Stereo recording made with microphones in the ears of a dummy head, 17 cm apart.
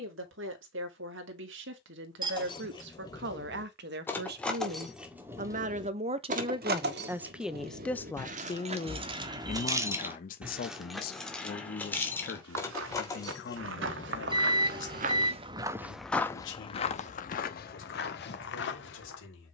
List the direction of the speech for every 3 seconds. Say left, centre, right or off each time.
right, right, centre, left, left, left, left.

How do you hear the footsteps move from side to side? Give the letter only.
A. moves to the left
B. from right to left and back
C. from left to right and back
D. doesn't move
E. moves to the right
A.